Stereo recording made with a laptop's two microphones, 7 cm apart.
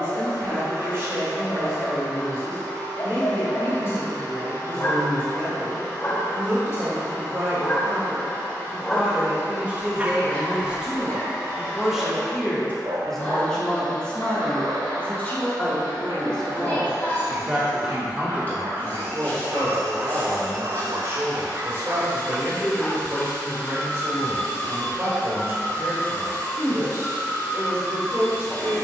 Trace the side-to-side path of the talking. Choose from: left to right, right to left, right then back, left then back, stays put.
left then back.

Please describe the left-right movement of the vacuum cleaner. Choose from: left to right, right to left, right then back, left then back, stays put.
stays put.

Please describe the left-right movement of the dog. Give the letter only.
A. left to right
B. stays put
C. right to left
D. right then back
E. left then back
D.